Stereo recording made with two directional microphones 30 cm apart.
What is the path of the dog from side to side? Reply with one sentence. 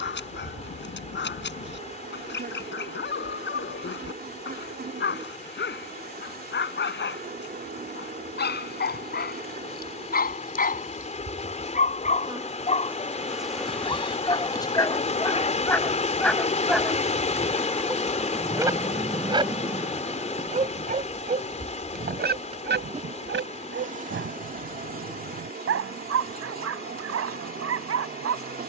In this clip you hear the dog move from left to right.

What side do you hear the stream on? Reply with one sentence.
You can hear the stream on the left.